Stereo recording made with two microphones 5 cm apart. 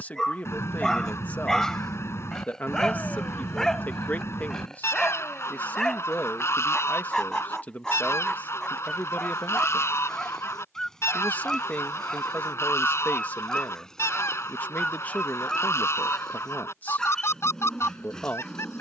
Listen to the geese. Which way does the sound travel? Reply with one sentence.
In this clip you hear the geese stay in one place.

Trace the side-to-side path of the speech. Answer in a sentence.
In this clip you hear the speech stay put.